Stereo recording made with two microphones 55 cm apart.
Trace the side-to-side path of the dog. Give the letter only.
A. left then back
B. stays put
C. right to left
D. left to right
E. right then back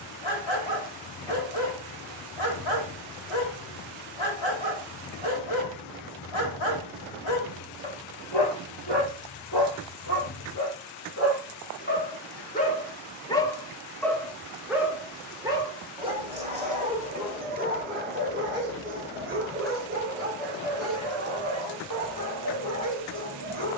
D.